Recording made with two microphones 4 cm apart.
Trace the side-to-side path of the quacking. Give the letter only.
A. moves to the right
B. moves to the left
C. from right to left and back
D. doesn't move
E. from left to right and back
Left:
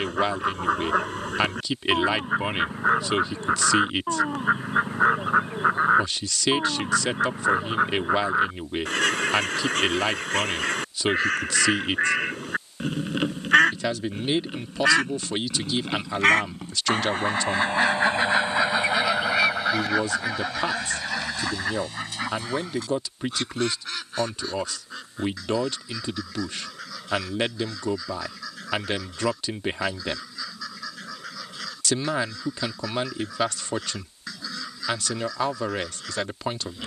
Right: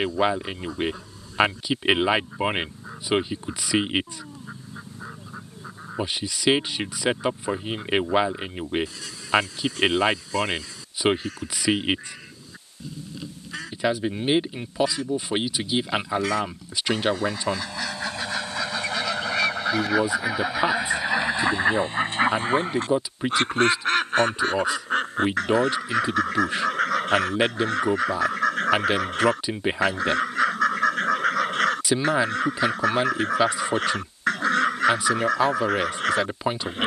A.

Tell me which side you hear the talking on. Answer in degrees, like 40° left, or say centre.
20° right.